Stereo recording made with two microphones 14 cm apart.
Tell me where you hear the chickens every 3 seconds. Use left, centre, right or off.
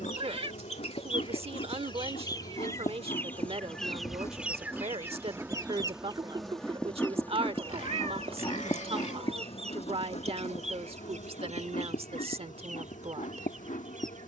left, centre, right, right, right.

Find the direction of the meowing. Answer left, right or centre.
right.